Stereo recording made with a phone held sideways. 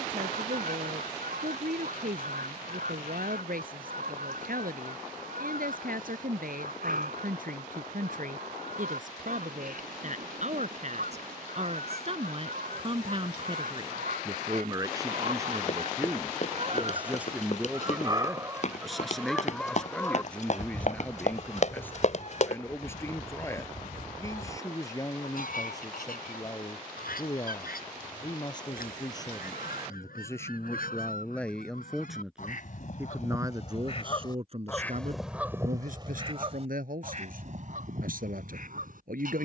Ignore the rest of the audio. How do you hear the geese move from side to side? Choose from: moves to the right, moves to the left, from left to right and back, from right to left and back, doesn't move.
from right to left and back.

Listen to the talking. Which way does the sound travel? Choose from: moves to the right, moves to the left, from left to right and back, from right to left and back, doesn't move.
from right to left and back.